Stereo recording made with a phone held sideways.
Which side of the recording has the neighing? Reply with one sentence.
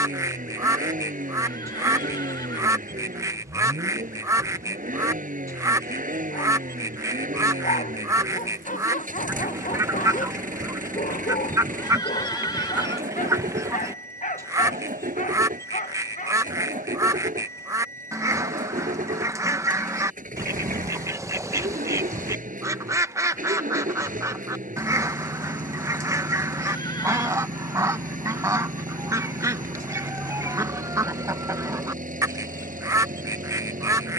In this clip you hear the neighing on the left.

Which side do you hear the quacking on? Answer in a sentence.
You can hear the quacking on the right.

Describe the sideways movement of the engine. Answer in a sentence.
In this clip you hear the engine stay in one place.